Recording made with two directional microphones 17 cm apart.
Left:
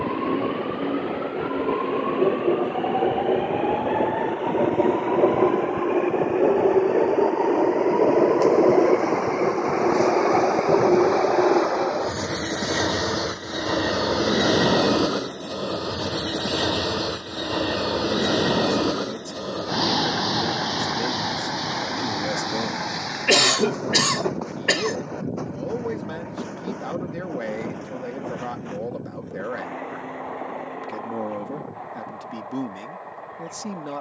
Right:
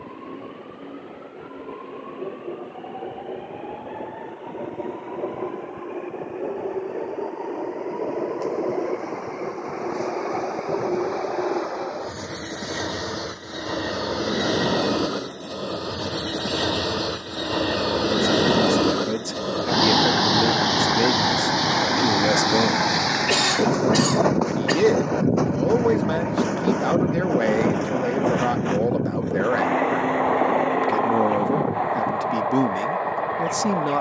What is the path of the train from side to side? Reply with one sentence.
In this clip you hear the train travel towards the right.